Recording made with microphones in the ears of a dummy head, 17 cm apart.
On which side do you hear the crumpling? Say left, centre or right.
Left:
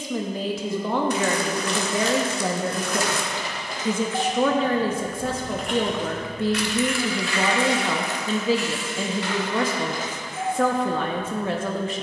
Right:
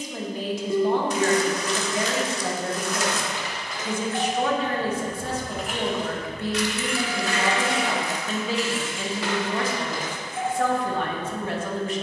left.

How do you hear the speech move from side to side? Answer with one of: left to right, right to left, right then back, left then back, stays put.
stays put.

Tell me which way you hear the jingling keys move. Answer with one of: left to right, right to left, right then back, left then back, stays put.
left to right.